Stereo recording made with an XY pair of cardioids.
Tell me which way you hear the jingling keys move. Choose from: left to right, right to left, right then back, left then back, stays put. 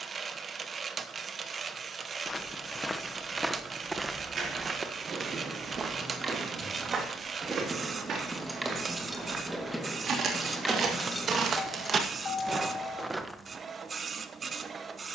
right to left.